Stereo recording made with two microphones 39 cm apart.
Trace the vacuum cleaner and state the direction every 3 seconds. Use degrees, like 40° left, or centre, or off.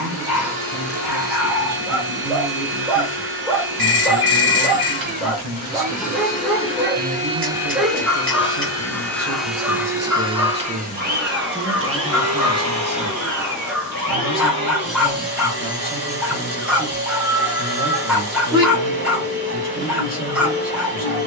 70° right, 60° right, 10° right, 20° right, 50° right, 70° right, 70° right.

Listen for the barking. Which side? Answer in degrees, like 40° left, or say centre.
centre.